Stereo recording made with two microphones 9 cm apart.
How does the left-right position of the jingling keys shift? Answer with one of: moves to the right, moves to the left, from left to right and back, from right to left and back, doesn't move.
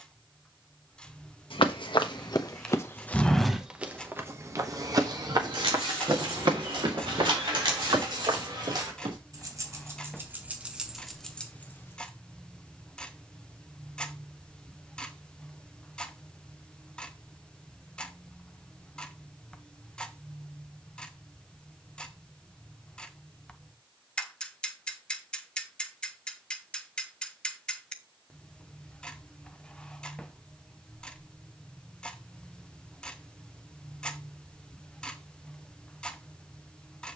moves to the left.